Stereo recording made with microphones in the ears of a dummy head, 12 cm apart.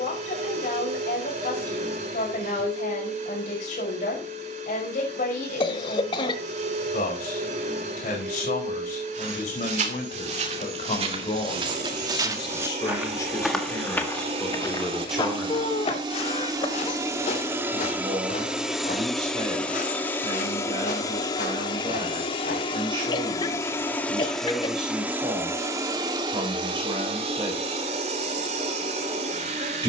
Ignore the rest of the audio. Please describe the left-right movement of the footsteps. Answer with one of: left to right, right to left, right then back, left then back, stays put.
right to left.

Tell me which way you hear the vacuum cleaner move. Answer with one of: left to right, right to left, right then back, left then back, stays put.
left then back.